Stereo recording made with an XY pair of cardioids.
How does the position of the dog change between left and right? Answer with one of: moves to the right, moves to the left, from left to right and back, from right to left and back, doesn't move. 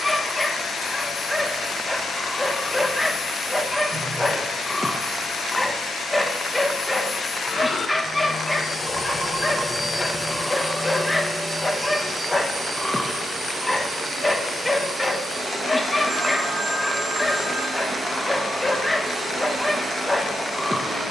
doesn't move.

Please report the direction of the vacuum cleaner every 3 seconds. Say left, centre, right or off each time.
left, left, left, centre, right, right, right.